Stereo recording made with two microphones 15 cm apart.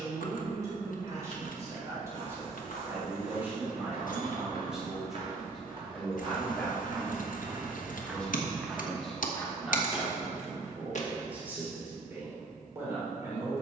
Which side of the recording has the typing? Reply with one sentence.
You can hear the typing on the left.